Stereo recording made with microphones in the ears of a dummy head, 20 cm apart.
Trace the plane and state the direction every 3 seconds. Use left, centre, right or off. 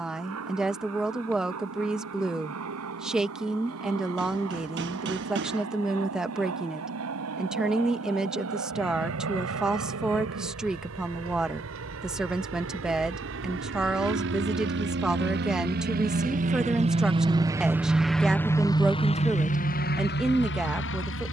right, right, right, right, right, right, left.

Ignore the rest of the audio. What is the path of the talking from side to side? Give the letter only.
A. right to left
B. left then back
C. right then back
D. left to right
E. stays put
E.